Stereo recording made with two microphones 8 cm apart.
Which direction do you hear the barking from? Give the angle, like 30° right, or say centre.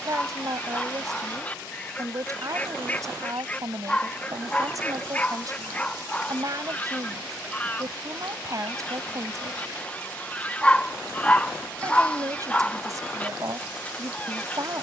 10° left.